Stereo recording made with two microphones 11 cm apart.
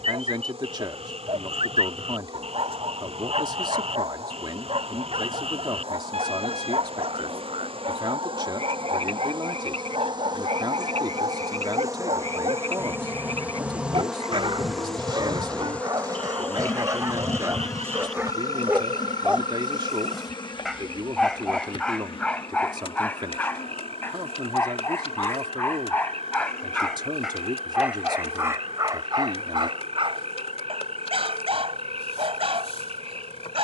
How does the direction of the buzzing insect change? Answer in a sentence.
You can hear the buzzing insect move to the left.